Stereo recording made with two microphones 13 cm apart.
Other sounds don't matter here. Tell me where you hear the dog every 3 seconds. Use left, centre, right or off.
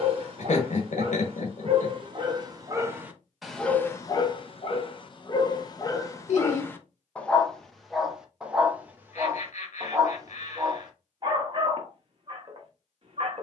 right, left, centre, right, right.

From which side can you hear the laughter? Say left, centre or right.
left.